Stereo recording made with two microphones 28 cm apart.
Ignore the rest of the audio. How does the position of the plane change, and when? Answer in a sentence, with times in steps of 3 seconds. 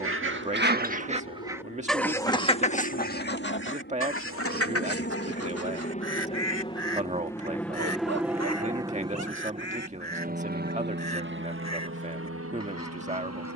You can hear the plane on the left from 0 s, in the centre from 6 s and on the right from 9 s.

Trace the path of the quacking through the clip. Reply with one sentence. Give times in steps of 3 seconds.
You can hear the quacking in the centre from 0 s and on the left from 3 s.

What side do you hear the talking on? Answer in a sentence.
You can hear the talking on the right.